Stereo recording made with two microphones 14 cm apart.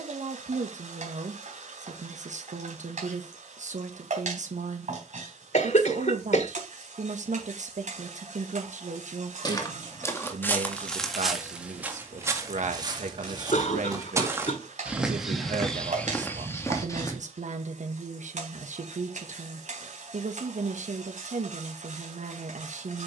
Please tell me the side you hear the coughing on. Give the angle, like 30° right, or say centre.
60° left.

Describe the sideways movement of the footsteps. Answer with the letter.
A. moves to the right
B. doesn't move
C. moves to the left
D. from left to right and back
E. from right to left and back
D.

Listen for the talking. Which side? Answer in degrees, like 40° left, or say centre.
60° right.